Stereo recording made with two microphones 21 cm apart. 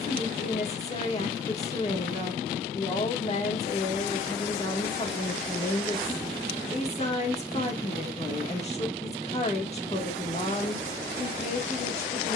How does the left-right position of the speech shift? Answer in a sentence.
In this clip you hear the speech stay in one place.